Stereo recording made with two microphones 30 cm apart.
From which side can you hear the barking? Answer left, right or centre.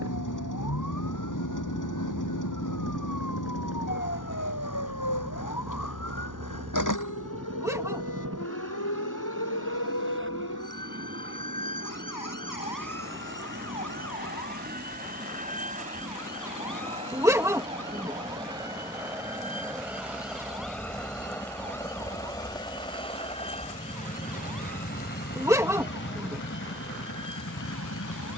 centre.